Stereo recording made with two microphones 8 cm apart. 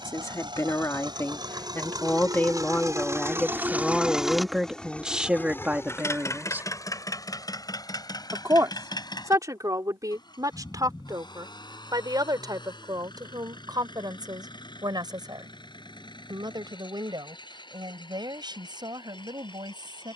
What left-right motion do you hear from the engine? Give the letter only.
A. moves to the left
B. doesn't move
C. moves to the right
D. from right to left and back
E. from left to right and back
A.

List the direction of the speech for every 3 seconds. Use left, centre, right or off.
left, centre, right, right, right, right, right.